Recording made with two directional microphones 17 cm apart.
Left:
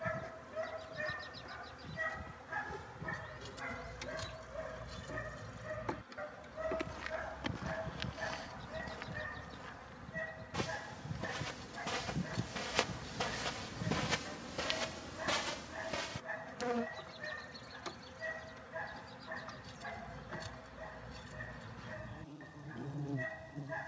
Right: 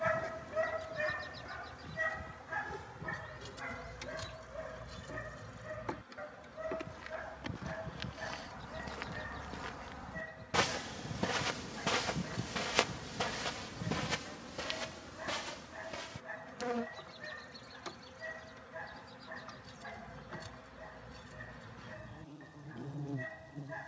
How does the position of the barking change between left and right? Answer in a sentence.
In this clip you hear the barking travel towards the left.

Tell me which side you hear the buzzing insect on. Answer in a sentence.
You can hear the buzzing insect in the centre.